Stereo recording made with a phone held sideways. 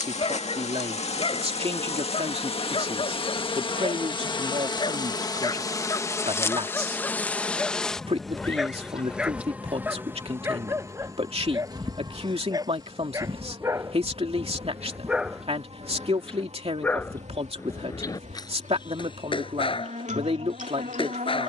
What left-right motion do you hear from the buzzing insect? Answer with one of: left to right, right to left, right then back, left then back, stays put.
left to right.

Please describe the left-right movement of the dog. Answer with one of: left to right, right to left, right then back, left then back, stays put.
right then back.